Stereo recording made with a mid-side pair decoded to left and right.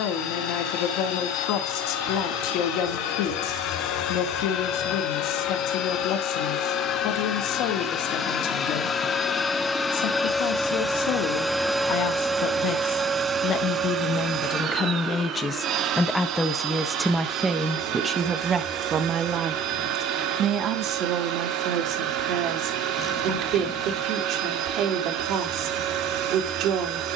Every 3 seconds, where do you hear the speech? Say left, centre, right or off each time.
left, left, left, left, left, centre, right, right, right.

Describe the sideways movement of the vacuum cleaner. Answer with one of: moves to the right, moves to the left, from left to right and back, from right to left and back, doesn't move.
moves to the right.